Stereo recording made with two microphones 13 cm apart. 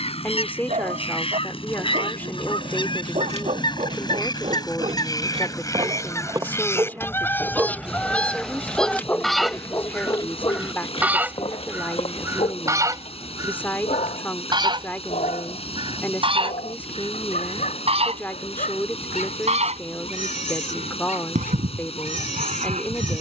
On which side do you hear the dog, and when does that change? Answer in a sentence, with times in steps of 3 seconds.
You can hear the dog on the right from 0 s, in the centre from 6 s and on the left from 9 s.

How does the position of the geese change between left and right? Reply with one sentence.
In this clip you hear the geese move to the right.